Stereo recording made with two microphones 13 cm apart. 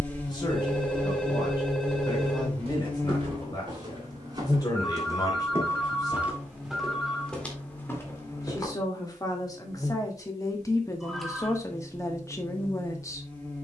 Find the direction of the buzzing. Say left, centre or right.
centre.